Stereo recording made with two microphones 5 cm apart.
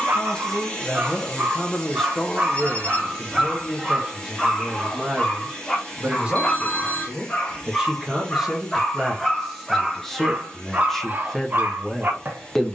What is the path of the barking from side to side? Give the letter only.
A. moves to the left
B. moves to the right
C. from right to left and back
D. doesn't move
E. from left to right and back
C.